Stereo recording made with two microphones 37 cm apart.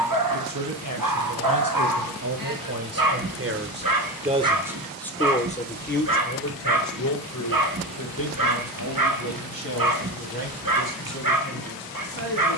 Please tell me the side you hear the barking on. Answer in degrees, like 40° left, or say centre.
60° right.